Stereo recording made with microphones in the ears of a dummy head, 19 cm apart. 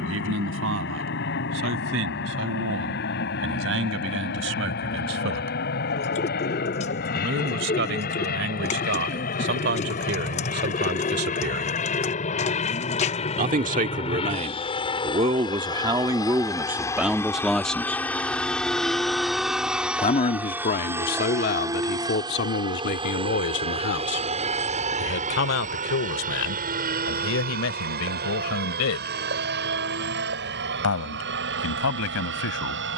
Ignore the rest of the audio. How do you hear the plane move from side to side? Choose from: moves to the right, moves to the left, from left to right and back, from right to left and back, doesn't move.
moves to the right.